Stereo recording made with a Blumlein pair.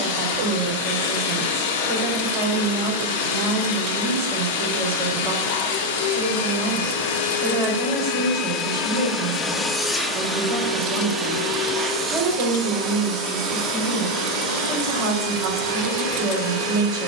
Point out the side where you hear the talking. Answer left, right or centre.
right.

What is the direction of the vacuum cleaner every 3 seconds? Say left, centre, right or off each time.
left, left, left, centre, right, right.